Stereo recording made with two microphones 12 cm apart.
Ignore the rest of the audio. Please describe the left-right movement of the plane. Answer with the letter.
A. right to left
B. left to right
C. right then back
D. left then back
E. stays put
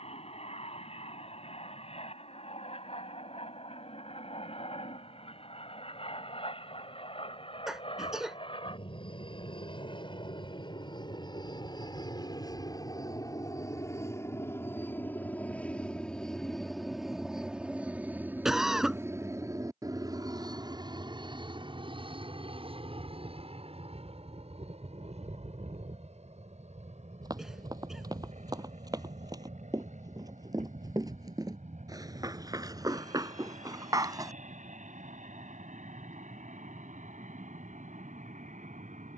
B.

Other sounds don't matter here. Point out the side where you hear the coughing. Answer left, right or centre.
centre.